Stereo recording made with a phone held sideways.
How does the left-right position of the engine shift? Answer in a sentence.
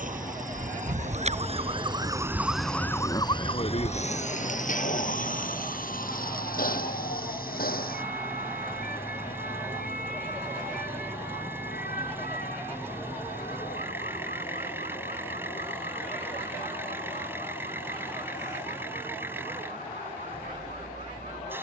In this clip you hear the engine stay in one place.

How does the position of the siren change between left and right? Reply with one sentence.
In this clip you hear the siren travel towards the left.